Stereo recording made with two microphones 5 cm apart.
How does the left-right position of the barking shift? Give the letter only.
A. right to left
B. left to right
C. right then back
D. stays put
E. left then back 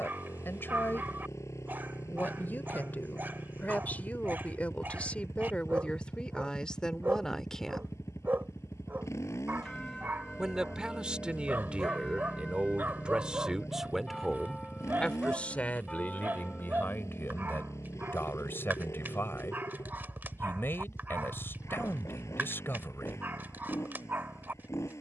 D.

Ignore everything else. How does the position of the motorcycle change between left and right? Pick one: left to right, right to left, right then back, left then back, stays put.
stays put.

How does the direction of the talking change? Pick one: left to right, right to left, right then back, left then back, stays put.
right then back.